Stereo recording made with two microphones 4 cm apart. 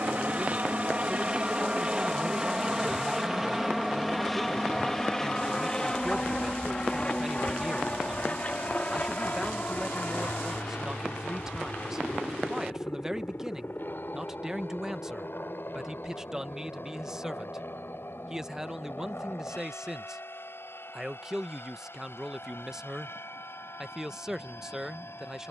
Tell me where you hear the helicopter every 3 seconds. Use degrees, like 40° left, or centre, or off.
20° right, centre, 20° left, 40° left, 50° left, 50° left, 60° left, 60° left, 60° left.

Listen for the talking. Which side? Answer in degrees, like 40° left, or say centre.
10° right.